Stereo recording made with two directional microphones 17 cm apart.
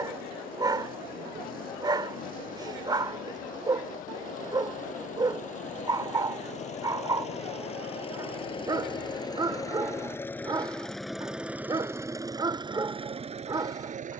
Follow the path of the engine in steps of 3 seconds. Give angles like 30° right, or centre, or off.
60° left, 50° left, 40° left, 10° left, 30° right.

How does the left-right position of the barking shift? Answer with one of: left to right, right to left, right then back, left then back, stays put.
stays put.